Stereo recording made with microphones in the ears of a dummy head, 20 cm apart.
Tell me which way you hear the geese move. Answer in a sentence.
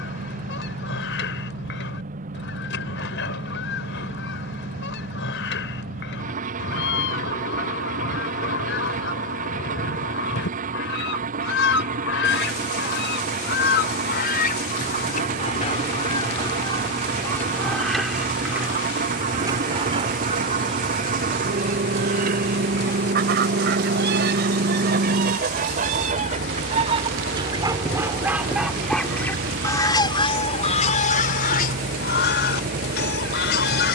In this clip you hear the geese move from left to right and back again.